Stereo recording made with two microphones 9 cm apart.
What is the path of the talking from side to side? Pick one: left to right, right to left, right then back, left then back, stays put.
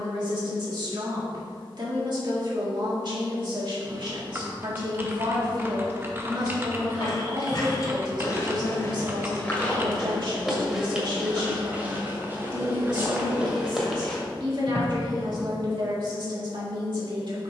stays put.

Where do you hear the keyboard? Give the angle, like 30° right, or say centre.
30° right.